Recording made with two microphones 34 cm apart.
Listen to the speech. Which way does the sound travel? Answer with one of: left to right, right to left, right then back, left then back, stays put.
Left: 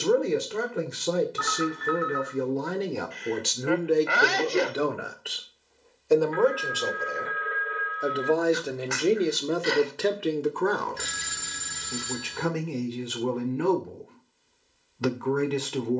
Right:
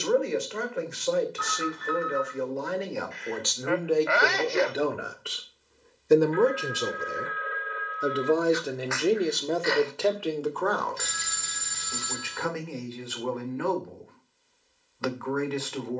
right then back.